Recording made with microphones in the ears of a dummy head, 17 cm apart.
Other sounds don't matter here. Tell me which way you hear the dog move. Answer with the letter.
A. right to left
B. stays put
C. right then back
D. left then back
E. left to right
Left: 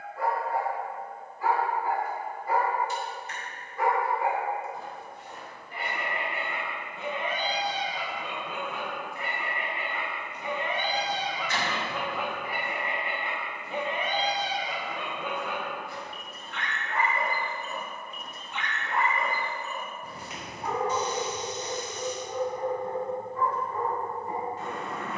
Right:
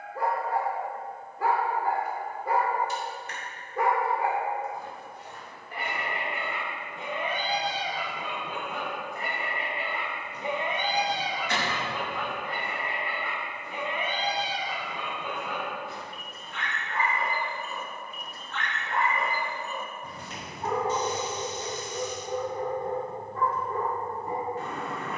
D.